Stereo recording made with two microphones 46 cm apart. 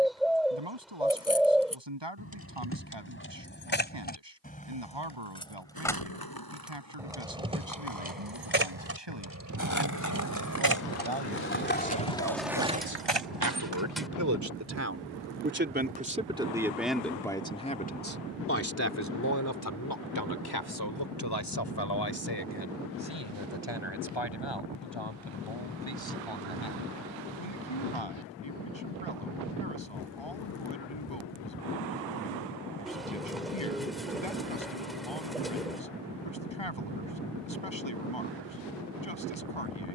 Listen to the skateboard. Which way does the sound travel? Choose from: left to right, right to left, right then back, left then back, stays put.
left to right.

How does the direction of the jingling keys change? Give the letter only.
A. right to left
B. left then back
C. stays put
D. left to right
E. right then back
D.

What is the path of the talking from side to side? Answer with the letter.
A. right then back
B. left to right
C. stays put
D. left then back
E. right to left
E.